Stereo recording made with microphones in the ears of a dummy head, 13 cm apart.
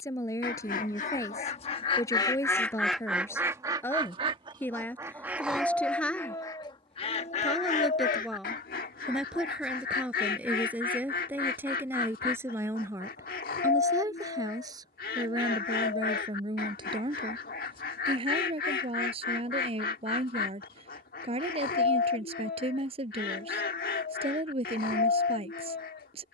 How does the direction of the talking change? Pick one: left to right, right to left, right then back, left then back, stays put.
left to right.